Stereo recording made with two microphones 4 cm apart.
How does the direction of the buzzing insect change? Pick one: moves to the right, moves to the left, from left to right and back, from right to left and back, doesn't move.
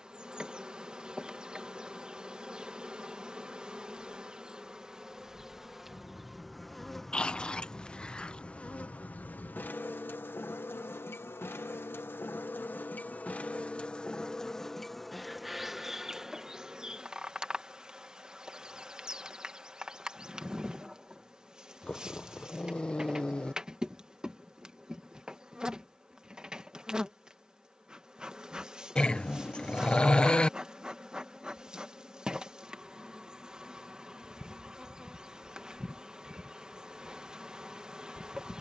from right to left and back.